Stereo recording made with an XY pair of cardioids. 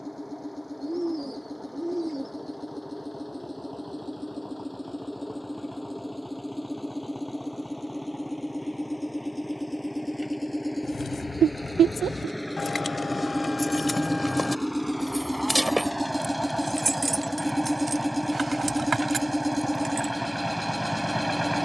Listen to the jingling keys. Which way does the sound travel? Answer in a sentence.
You can hear the jingling keys travel towards the right.